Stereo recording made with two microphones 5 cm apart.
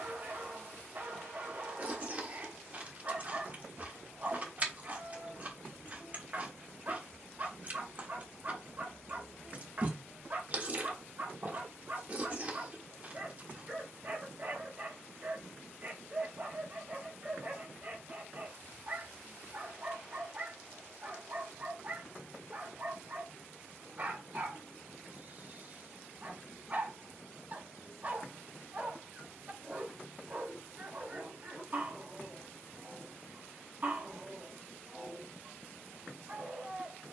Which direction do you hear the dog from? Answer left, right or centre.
right.